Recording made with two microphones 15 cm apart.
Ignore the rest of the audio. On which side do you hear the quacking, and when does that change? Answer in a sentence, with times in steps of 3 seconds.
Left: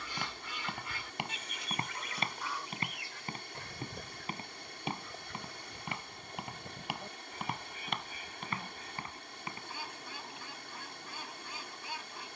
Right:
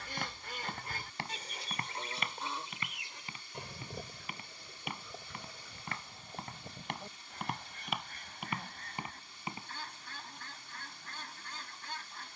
In this clip you hear the quacking on the right from 0 s and in the centre from 3 s.